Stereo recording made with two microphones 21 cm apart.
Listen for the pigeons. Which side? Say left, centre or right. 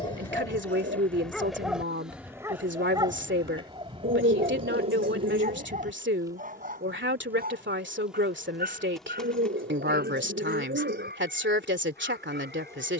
right.